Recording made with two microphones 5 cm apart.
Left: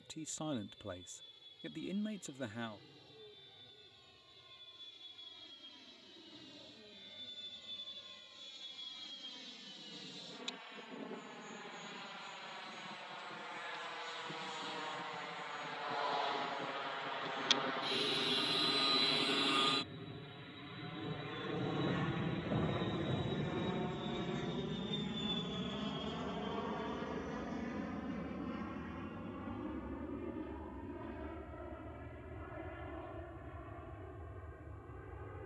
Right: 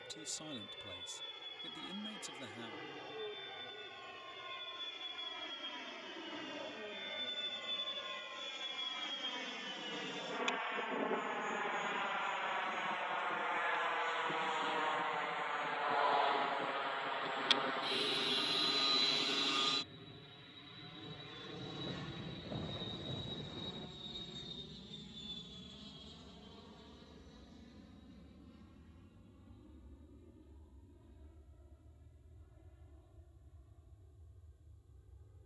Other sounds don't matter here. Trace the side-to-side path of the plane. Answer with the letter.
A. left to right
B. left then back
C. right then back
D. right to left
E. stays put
D.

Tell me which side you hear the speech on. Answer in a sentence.
You can hear the speech on the left.